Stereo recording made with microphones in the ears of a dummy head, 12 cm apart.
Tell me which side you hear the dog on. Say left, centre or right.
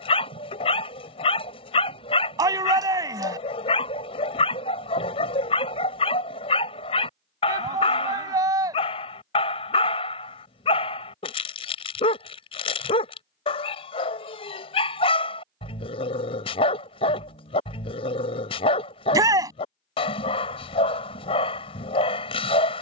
left.